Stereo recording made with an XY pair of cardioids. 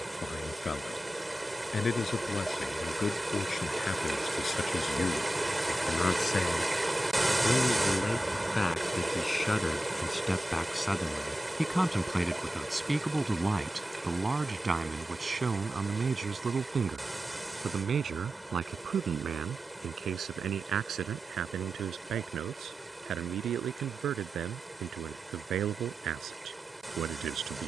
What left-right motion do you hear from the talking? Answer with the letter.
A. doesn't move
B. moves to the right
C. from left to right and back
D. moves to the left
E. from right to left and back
B.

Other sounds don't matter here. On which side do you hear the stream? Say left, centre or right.
centre.